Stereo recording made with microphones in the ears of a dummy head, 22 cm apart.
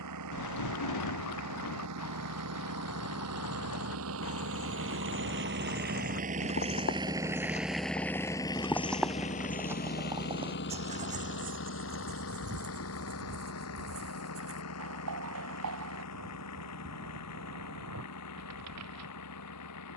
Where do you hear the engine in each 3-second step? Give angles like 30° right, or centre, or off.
70° right, 50° right, 10° right, 40° left, 60° left, 70° left, 70° left.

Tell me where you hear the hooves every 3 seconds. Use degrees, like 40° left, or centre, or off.
70° left, 60° left, 30° left, 20° right, 50° right, 60° right, 70° right.